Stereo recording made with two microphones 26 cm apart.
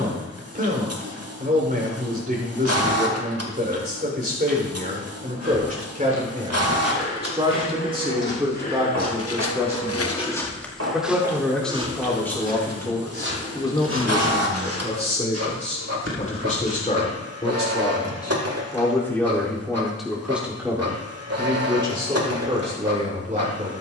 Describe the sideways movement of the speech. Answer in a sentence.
You can hear the speech go left and come back.